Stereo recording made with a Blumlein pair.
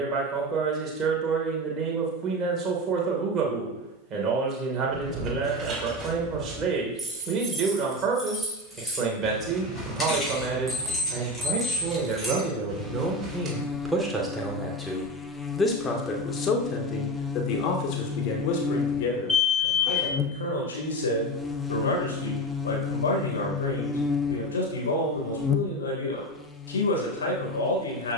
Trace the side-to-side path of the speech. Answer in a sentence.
In this clip you hear the speech travel towards the left.